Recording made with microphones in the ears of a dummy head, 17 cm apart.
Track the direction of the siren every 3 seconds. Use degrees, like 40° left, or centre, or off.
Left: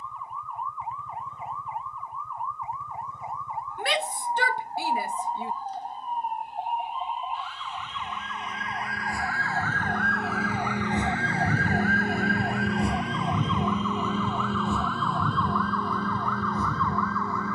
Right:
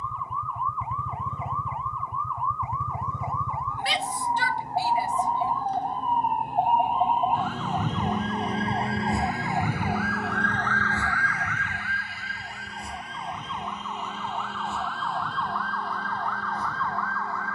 60° right, 60° right, 40° right, 10° left, 60° left, 80° left.